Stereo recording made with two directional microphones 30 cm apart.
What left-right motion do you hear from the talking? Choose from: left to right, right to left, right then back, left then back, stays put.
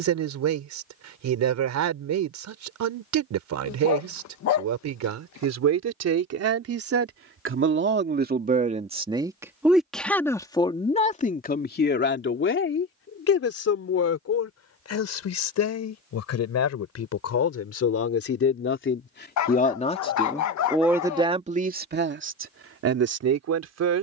left then back.